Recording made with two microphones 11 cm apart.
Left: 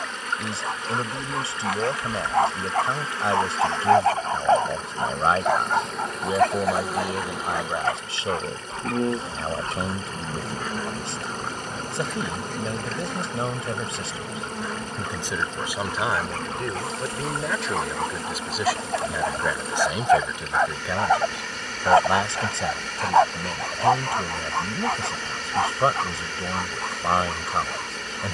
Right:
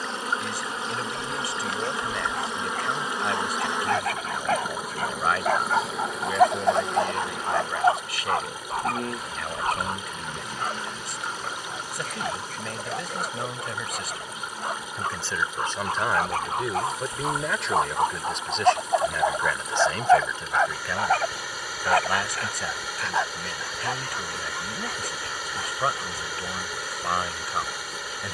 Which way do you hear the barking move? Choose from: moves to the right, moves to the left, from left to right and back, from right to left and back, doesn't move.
from left to right and back.